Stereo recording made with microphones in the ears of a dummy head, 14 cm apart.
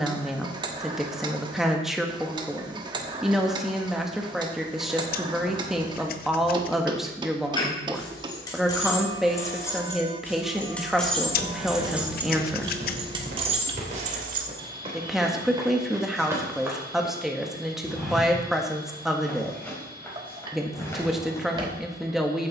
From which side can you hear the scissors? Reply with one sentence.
In this clip you hear the scissors on the left.